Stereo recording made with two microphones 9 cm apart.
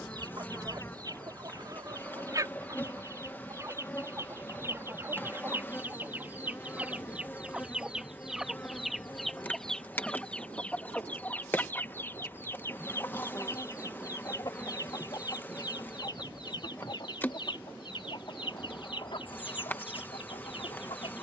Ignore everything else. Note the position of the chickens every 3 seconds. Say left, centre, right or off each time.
right, right, centre, centre, left, left, left.